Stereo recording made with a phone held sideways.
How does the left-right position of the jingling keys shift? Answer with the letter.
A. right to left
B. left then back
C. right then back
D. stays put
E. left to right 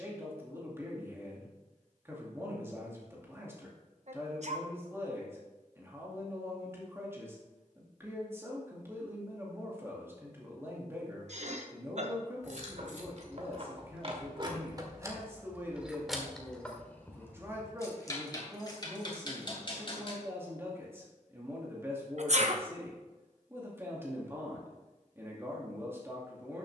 A.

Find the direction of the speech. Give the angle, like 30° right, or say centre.
20° right.